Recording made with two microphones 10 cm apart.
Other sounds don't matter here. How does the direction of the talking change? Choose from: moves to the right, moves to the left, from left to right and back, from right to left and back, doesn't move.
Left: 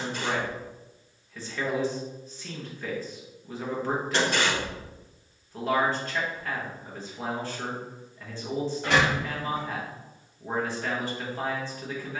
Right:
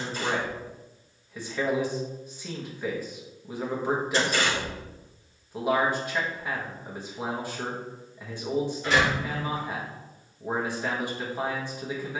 doesn't move.